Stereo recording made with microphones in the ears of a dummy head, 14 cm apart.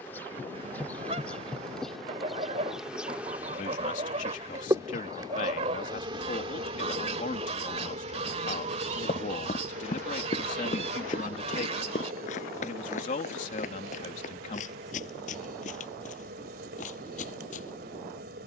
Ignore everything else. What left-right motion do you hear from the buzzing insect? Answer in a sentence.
In this clip you hear the buzzing insect travel towards the right.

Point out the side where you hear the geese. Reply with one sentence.
In this clip you hear the geese on the right.